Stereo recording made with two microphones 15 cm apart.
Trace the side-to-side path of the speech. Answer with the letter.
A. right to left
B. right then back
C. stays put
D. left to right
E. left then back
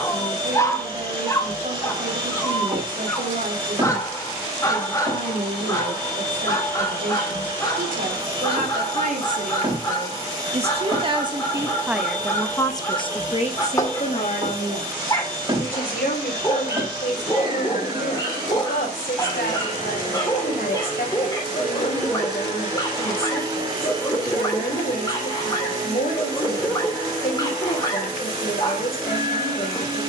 A.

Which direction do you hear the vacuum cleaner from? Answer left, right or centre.
right.